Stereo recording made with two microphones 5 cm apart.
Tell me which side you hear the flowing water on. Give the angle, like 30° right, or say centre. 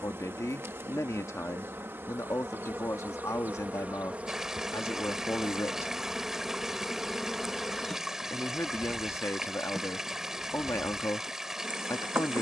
10° right.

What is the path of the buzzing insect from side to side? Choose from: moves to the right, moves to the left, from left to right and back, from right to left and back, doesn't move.
from right to left and back.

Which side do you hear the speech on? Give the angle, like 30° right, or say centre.
80° left.